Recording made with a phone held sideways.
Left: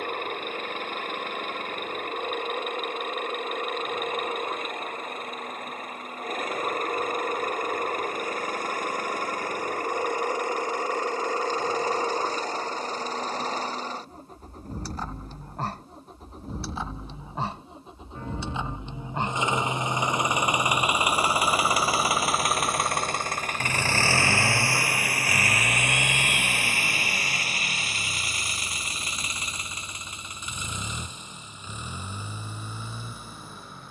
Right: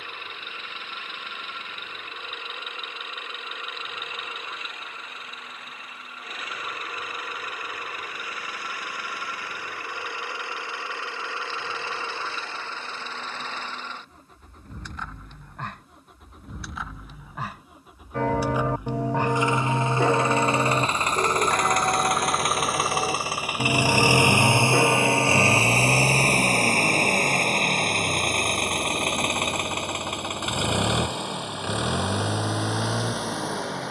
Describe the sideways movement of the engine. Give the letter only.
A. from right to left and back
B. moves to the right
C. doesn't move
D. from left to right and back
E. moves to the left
B.